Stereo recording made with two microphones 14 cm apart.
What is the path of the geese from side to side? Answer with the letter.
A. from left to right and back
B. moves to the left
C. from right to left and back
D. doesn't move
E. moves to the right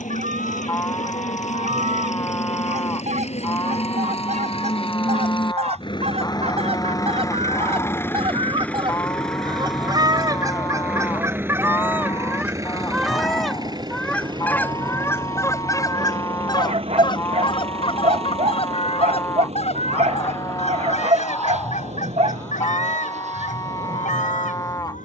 B.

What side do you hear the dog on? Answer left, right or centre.
right.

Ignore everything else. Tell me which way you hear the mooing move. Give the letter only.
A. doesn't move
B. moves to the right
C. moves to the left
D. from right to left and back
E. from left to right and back
A.